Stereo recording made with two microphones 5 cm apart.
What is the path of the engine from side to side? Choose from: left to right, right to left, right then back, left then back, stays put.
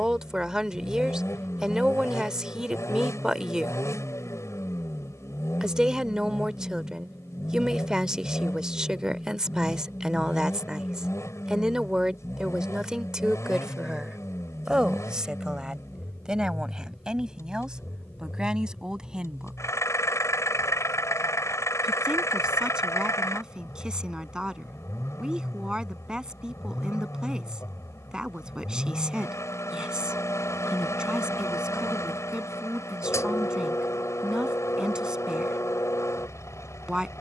stays put.